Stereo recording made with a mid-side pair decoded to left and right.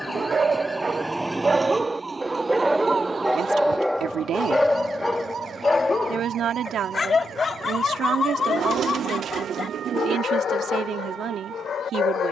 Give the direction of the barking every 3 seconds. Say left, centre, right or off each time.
right, centre, left, left.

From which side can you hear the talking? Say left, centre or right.
right.